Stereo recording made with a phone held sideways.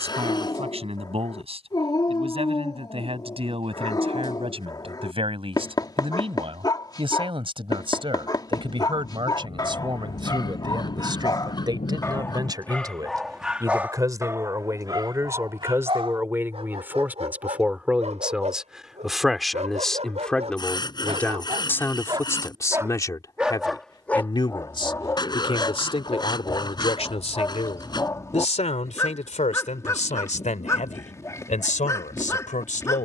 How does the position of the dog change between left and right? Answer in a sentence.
In this clip you hear the dog move from left to right and back again.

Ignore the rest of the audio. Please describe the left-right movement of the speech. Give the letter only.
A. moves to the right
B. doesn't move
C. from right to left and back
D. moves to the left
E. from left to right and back
D.